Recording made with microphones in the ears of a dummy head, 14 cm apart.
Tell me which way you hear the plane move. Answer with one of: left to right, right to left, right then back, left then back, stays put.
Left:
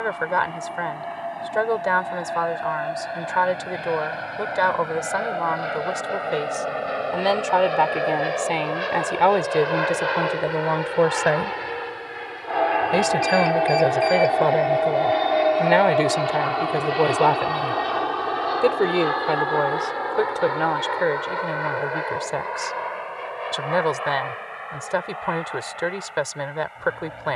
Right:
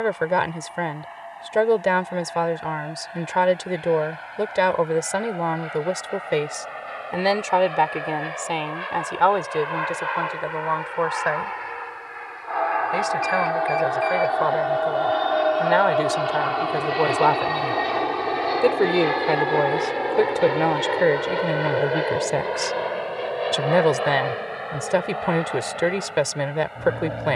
left to right.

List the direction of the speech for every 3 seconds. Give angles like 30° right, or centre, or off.
30° right, 30° right, 10° right, 30° left, 40° left, 20° left, 10° right, 30° right, 30° right.